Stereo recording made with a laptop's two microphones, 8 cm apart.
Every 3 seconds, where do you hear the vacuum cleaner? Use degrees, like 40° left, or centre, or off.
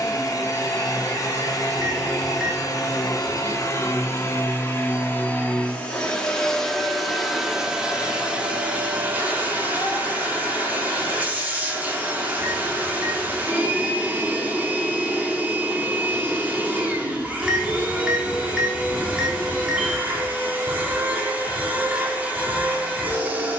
50° left, 30° left, 10° right, 20° right, 20° right, 20° right, 20° right, 20° right.